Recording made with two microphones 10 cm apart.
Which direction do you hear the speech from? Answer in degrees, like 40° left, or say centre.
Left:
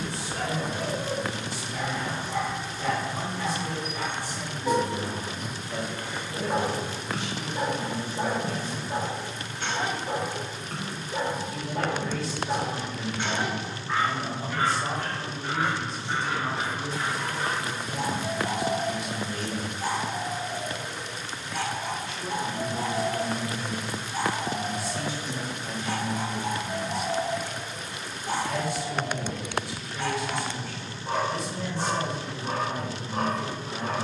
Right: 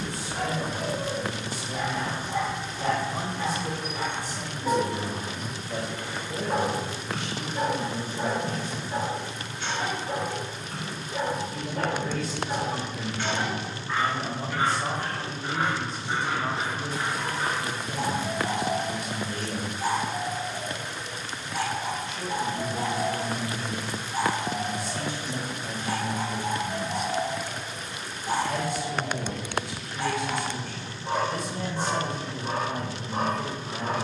50° right.